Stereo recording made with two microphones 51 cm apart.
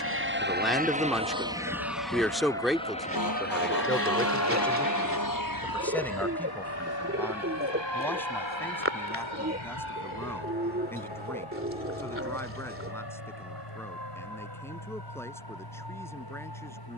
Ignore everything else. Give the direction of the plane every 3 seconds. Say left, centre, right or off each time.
centre, left, left, left, left, left.